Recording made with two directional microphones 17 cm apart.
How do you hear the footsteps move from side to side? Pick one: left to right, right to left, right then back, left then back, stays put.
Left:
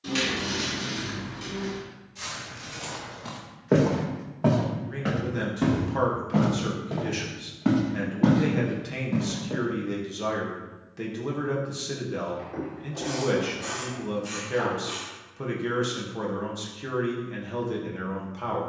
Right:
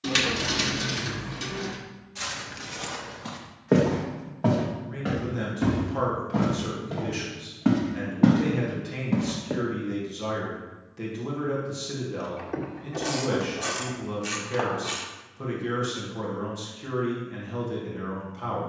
left then back.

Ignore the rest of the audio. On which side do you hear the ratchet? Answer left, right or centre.
right.